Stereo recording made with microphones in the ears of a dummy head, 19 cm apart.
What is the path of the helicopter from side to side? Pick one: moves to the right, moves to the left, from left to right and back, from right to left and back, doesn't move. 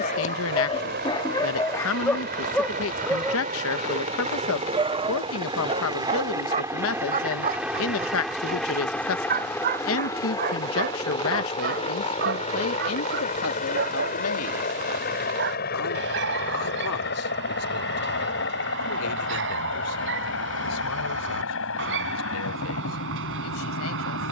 moves to the left.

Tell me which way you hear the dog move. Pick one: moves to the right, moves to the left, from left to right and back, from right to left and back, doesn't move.
moves to the right.